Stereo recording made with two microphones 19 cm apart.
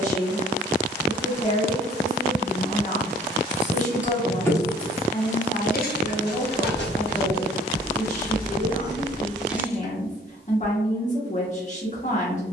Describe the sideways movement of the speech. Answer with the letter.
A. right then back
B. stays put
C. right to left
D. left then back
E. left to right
B.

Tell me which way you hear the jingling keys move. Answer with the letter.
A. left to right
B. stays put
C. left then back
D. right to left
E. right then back
C.